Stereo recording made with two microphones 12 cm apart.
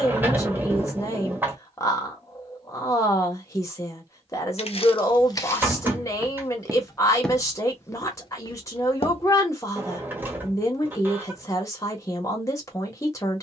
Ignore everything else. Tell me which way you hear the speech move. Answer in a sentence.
You can hear the speech stay in one place.